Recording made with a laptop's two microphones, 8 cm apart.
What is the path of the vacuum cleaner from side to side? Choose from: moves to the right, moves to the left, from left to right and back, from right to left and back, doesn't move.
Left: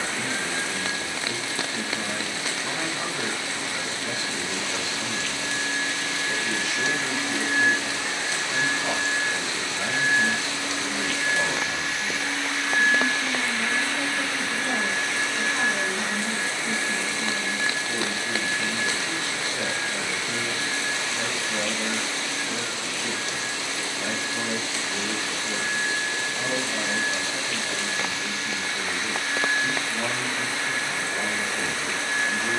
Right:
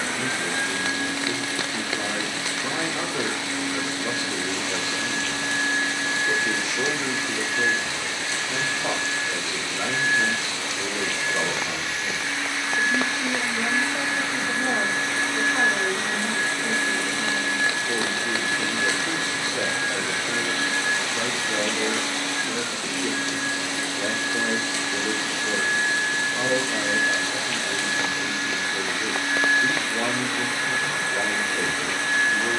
from right to left and back.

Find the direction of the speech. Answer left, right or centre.
right.